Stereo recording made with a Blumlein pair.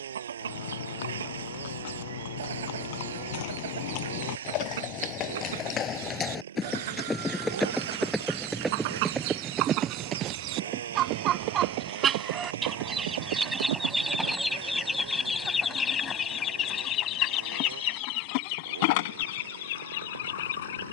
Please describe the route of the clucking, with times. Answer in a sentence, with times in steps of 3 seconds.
You can hear the clucking on the right from 0 s, in the centre from 12 s and on the left from 15 s.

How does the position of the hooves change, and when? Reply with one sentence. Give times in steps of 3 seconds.
You can hear the hooves on the left from 0 s, in the centre from 6 s, on the right from 9 s and not at all from 18 s.